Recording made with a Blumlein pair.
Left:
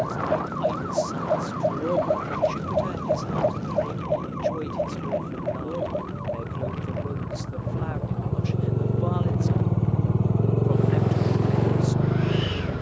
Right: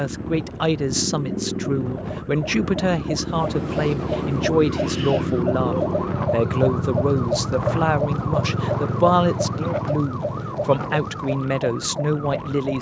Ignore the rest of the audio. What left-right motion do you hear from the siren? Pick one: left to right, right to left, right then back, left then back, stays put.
left to right.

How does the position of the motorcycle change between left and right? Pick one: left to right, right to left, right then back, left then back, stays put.
right to left.